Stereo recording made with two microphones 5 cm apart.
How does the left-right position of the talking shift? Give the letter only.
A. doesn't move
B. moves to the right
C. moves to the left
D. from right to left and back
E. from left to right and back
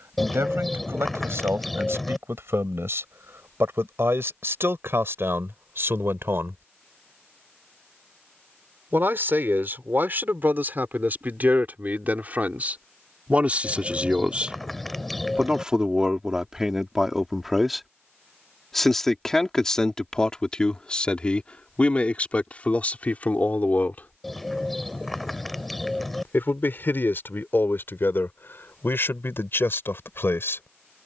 C.